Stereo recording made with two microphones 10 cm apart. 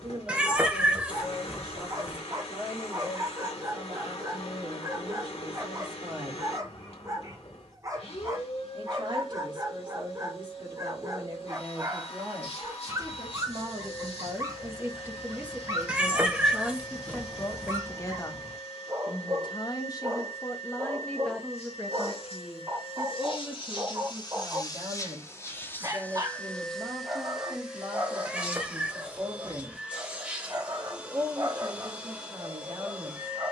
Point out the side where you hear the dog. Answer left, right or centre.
right.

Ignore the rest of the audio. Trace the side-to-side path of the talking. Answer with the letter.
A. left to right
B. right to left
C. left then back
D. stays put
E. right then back
C.